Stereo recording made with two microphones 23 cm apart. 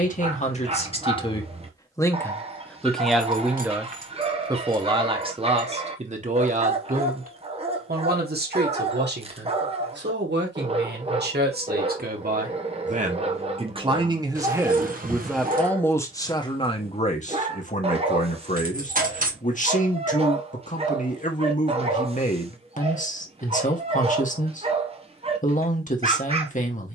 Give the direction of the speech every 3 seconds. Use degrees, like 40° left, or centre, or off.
20° left, 20° right, 40° right, 50° right, 30° right, 20° left, 30° left, 30° left, 30° left.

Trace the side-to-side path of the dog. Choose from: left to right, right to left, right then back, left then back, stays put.
stays put.